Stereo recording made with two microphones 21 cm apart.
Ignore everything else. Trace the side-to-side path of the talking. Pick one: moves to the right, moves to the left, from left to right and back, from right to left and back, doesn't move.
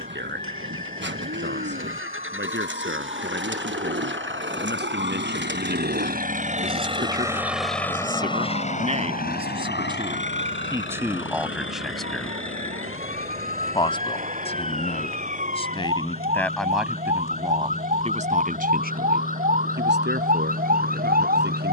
from right to left and back.